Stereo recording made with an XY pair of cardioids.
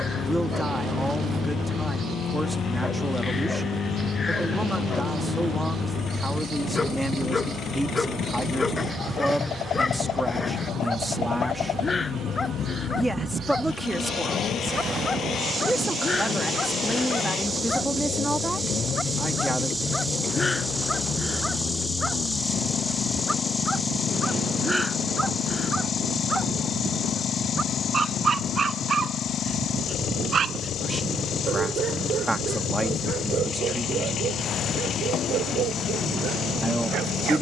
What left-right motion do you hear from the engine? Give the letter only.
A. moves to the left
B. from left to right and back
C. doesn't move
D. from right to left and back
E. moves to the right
C.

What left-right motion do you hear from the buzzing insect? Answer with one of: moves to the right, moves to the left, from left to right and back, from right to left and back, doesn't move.
moves to the left.